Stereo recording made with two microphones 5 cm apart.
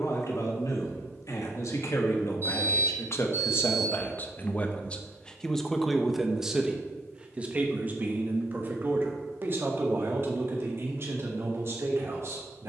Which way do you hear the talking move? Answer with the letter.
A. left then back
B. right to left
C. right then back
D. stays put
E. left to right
E.